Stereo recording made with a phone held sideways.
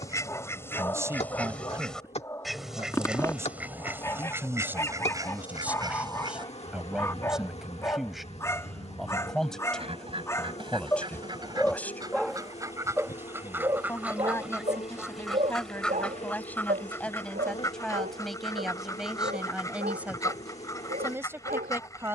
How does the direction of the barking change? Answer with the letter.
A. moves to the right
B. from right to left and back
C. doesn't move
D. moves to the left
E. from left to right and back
A.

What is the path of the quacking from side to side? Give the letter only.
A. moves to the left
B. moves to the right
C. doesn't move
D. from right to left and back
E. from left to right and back
E.